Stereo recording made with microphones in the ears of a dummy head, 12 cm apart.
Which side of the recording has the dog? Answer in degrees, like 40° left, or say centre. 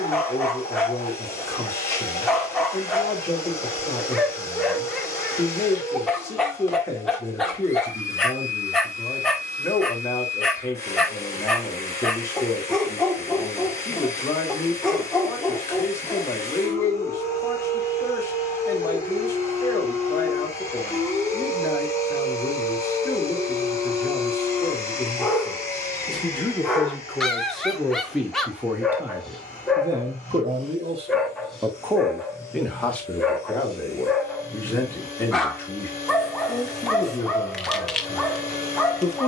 centre.